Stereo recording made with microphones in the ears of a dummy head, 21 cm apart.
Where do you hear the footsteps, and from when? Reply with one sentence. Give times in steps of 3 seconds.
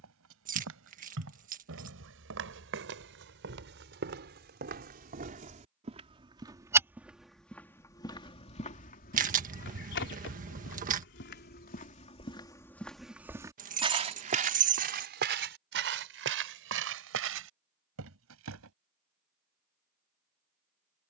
You can hear the footsteps on the right from 0 s, in the centre from 6 s, on the left from 9 s, in the centre from 12 s and on the right from 15 s.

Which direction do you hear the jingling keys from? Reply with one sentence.
In this clip you hear the jingling keys on the right.